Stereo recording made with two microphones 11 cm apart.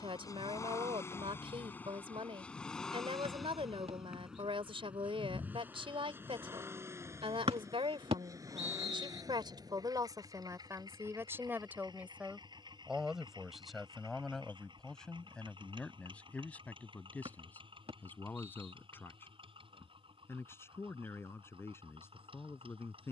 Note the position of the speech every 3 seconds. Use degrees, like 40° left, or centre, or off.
60° right, 60° right, 60° right, 30° right, centre, 10° left, 20° left, 20° left.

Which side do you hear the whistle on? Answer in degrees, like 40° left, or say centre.
60° right.